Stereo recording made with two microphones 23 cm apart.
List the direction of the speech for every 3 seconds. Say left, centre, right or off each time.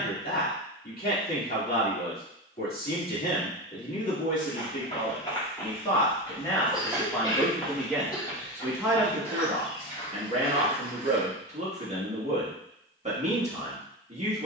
left, left, centre, right, right.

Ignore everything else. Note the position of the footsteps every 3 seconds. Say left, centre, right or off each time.
off, left, centre, left, off.